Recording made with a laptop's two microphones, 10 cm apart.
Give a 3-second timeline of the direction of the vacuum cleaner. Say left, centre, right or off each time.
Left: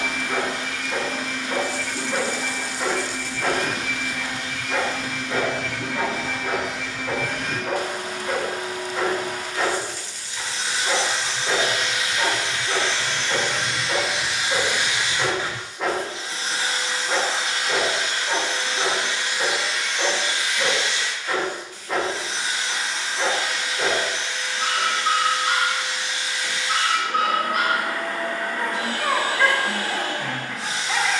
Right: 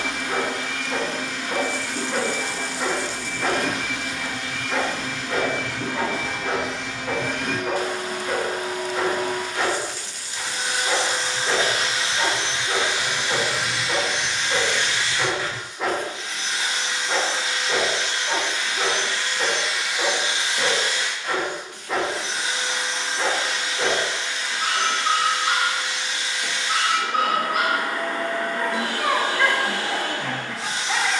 right, right, right, right, centre, left, centre, right, right, right, right.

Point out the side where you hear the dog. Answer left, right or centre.
centre.